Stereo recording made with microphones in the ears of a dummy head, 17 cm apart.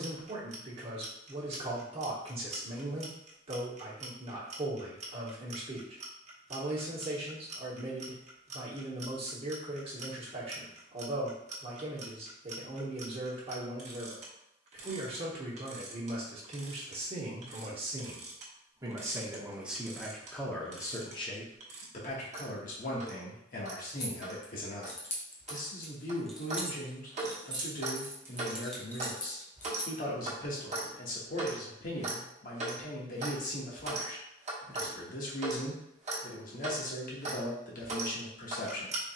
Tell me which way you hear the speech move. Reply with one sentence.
You can hear the speech move to the left.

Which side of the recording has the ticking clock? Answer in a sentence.
You can hear the ticking clock on the right.